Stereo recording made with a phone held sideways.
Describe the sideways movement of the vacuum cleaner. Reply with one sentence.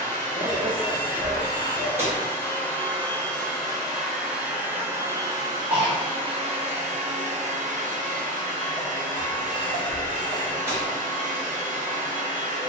In this clip you hear the vacuum cleaner move to the right.